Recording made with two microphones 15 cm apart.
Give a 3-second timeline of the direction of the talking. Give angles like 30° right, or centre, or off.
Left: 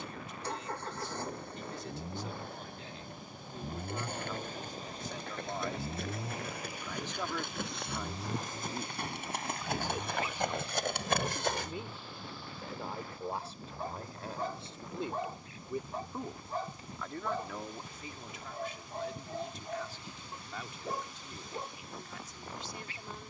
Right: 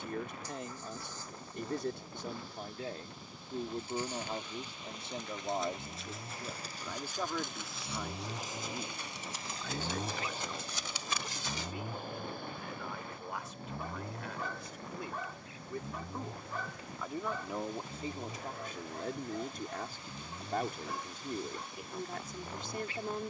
50° right, 30° right, centre, 20° left, 30° left, centre, 50° right, 50° right.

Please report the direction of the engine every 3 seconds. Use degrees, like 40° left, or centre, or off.
60° left, 40° left, centre, 30° right, 60° right, 70° right, 70° right, 80° right.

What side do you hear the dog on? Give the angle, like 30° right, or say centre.
30° left.